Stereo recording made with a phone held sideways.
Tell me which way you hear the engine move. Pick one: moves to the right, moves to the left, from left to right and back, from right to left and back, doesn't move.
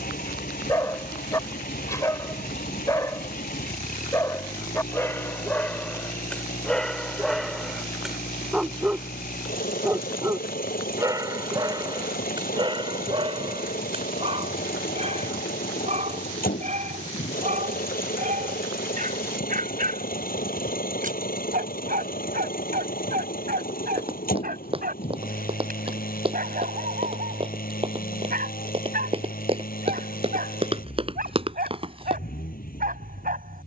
doesn't move.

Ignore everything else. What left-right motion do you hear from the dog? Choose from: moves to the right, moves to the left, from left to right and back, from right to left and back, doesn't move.
moves to the right.